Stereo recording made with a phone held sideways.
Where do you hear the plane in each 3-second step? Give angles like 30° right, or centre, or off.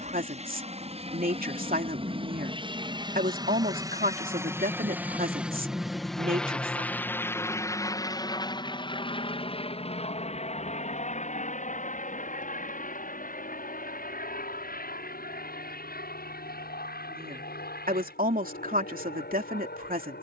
40° right, 20° right, 20° left, 40° left, 60° left, 70° left, 70° left.